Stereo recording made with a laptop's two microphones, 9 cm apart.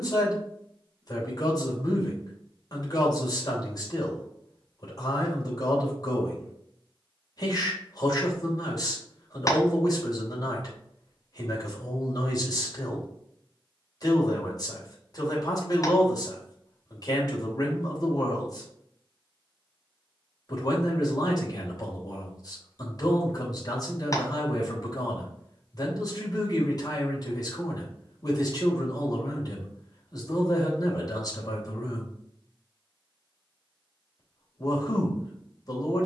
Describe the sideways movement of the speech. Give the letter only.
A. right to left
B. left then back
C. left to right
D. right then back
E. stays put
E.